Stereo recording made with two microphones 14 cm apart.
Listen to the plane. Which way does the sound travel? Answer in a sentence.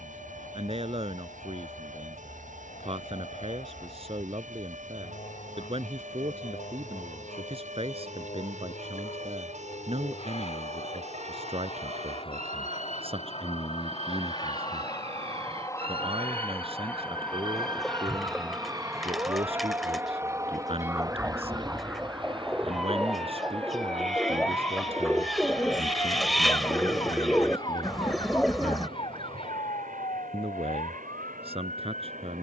You can hear the plane move from left to right.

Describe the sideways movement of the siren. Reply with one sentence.
You can hear the siren move to the left.